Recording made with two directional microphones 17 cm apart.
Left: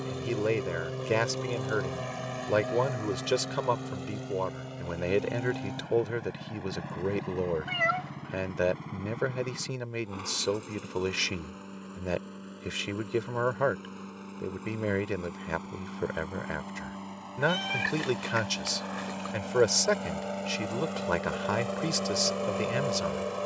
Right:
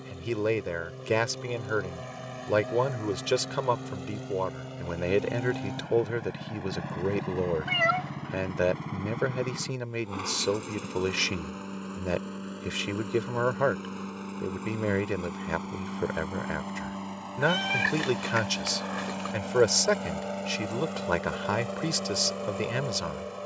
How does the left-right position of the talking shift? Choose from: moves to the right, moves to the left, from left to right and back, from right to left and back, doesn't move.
doesn't move.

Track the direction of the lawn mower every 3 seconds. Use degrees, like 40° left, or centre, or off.
30° left, centre, 20° right, 30° right, 30° right, 30° right, 10° right, 20° left.